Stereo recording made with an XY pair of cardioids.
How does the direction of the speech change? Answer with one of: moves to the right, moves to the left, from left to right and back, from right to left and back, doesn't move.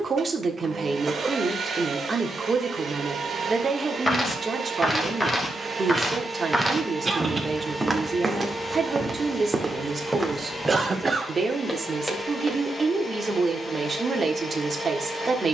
doesn't move.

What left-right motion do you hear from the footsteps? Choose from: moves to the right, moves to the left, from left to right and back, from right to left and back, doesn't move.
from left to right and back.